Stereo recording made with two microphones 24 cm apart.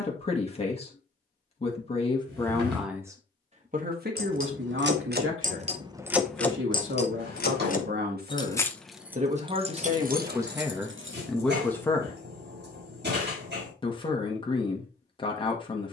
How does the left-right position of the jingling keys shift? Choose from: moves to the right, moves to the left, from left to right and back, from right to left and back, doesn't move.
from right to left and back.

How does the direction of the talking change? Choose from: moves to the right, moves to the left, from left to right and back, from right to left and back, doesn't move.
from left to right and back.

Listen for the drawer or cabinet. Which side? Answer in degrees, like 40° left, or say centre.
50° right.